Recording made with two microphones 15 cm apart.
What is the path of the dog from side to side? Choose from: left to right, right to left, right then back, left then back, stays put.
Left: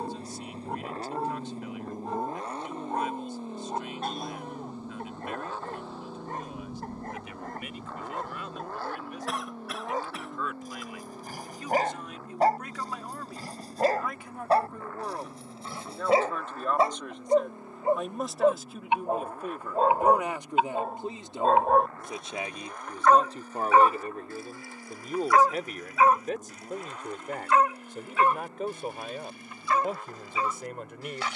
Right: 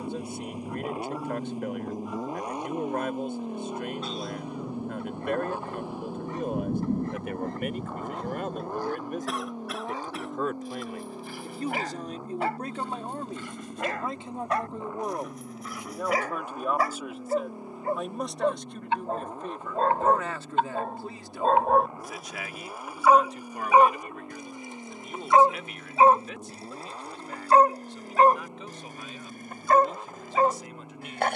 left to right.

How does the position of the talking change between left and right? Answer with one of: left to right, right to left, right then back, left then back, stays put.
right to left.